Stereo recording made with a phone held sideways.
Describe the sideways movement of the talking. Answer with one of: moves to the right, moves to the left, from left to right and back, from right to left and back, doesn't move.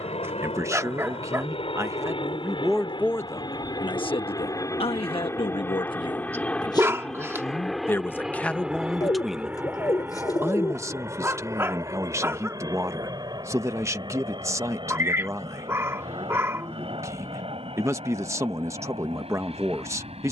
from right to left and back.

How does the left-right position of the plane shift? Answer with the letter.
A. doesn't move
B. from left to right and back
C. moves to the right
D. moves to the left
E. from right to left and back
C.